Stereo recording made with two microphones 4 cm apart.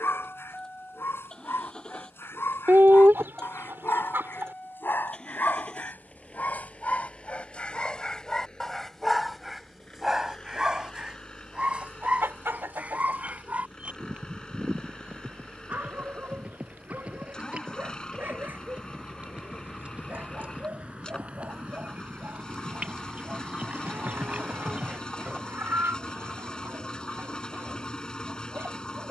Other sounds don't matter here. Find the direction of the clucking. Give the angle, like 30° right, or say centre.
70° right.